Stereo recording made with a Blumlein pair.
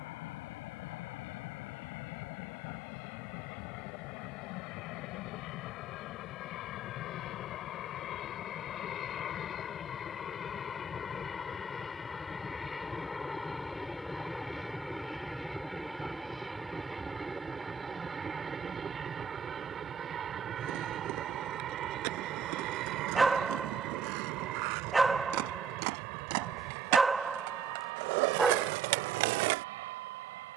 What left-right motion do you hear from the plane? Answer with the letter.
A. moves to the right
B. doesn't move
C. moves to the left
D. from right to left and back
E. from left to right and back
A.